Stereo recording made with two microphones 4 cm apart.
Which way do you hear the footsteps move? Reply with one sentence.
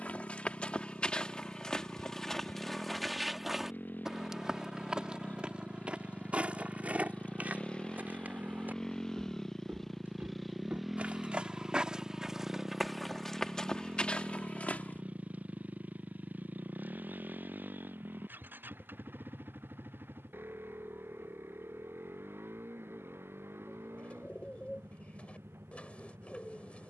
In this clip you hear the footsteps move from left to right and back again.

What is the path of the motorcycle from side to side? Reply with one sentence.
You can hear the motorcycle travel towards the right.